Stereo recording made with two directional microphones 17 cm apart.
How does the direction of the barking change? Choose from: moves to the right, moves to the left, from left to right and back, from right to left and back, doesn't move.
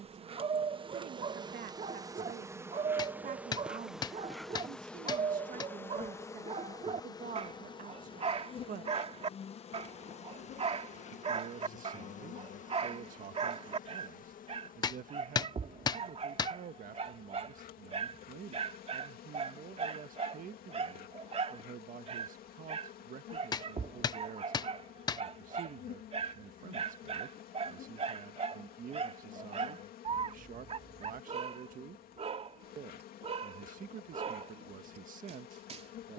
doesn't move.